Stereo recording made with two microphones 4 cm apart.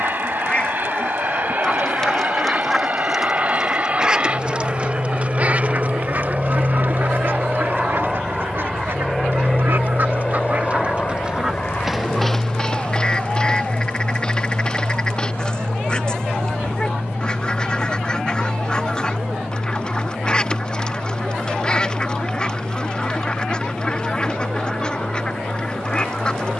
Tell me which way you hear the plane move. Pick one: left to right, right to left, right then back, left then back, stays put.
right to left.